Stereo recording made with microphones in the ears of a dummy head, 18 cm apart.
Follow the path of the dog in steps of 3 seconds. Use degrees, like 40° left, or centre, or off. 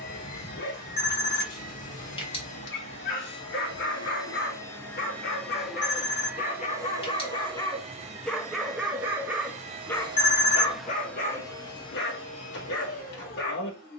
50° left, 50° left, 20° left, 20° left, 50° left.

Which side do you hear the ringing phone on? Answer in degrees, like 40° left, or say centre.
30° left.